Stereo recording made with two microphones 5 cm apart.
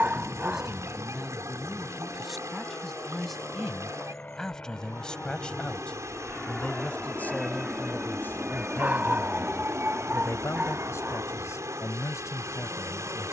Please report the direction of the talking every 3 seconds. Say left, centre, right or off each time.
centre, centre, left, left, left.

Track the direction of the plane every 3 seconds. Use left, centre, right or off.
left, left, centre, right, right.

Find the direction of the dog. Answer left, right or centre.
right.